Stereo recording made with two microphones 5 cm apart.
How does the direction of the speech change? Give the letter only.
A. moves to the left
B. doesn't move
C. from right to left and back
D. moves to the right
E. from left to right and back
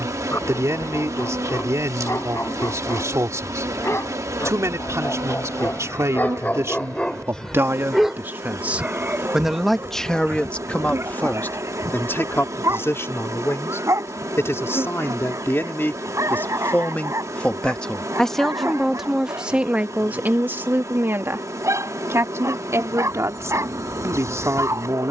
C.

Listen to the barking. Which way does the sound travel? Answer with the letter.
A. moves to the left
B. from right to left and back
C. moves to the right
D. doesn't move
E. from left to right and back
C.